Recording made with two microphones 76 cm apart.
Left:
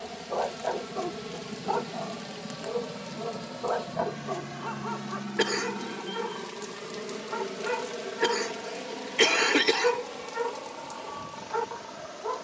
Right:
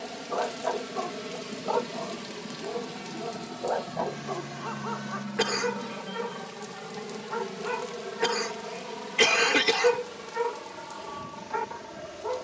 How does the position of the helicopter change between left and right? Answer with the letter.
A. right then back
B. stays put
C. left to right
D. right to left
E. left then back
C.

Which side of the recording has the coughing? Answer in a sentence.
In this clip you hear the coughing on the right.